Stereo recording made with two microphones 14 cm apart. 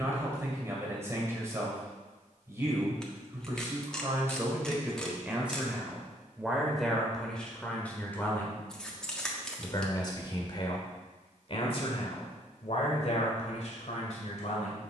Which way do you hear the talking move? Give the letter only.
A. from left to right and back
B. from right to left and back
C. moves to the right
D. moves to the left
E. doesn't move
D.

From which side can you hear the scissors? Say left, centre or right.
centre.